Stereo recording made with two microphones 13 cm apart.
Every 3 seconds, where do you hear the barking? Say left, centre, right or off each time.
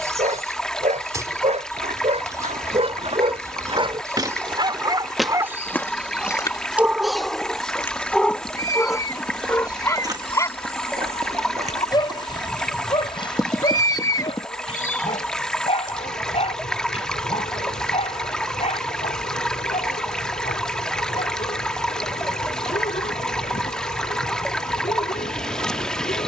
right, right, centre, left, left, left, left, left, left.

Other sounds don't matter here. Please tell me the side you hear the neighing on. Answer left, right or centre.
left.